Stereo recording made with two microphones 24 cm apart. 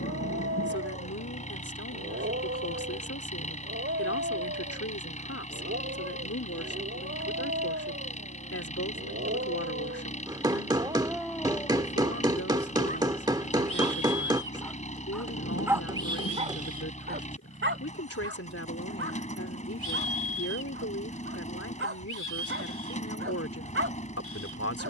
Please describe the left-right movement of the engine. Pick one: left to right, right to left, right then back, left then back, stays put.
stays put.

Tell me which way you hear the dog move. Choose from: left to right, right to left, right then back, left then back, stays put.
left then back.